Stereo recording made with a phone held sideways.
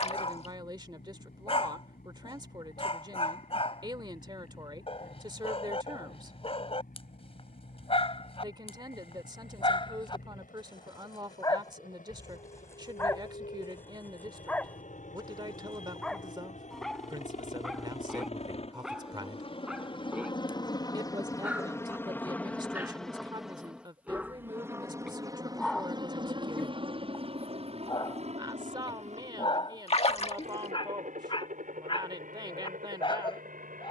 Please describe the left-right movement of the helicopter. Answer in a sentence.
You can hear the helicopter travel towards the right.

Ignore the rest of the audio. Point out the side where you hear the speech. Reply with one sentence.
You can hear the speech on the right.